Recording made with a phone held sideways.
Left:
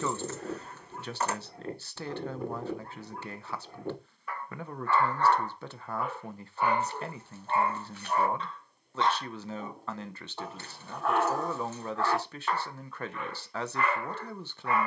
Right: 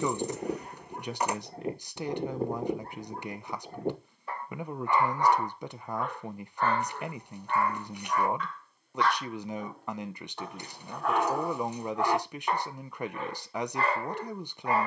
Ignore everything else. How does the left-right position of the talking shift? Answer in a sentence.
You can hear the talking stay put.